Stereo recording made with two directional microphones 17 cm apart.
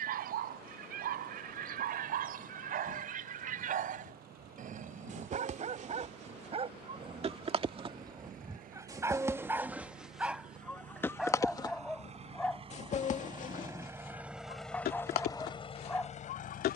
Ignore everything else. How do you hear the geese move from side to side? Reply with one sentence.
You can hear the geese travel towards the left.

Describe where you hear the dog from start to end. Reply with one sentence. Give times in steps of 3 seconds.
You can hear the dog on the right from 0 s and in the centre from 9 s.